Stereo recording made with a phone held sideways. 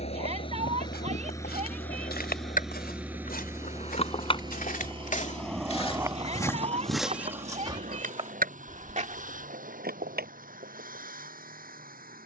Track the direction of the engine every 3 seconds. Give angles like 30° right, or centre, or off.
20° left, 30° right, 50° right, 60° right.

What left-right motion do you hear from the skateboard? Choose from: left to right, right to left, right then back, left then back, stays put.
left to right.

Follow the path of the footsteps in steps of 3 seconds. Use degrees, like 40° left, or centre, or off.
80° left, 60° left, 10° right, 50° right.